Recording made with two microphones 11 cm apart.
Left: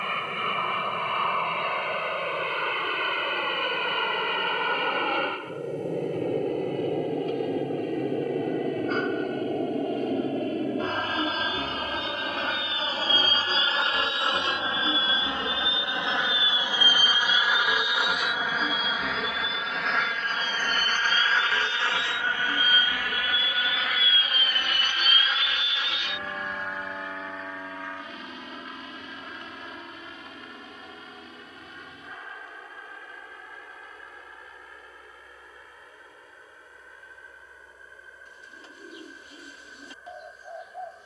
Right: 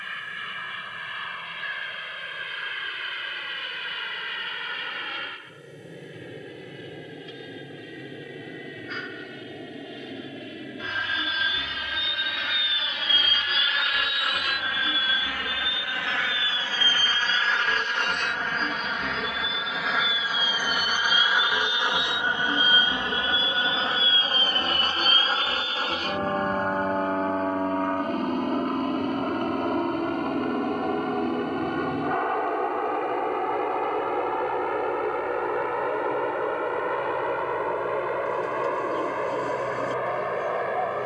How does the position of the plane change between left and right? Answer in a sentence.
You can hear the plane go from the left side to the right.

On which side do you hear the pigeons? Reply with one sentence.
In this clip you hear the pigeons on the right.